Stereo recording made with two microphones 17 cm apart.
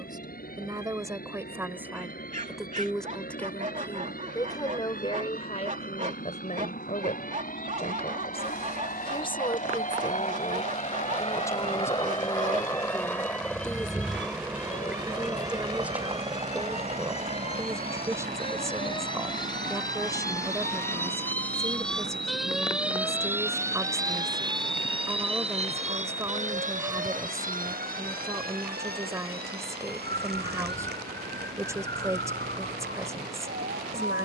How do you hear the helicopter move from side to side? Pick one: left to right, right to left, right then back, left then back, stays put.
left to right.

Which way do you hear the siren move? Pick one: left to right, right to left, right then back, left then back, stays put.
left to right.